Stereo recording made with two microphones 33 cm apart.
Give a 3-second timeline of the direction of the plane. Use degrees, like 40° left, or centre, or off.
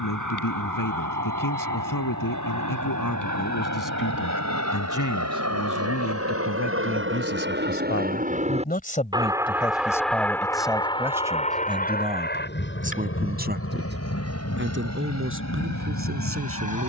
70° right, 60° right, 30° right, 10° left, 40° left, 50° left.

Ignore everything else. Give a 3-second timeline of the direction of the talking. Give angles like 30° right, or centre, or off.
80° left, 70° left, 40° left, centre, 30° right, 40° right.